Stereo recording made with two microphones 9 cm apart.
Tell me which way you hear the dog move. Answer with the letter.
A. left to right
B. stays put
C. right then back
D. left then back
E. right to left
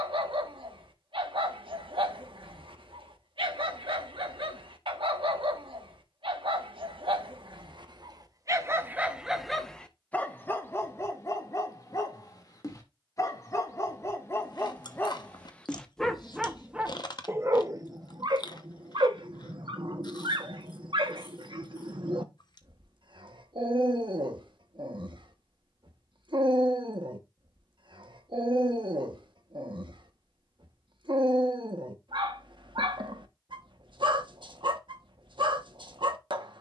D.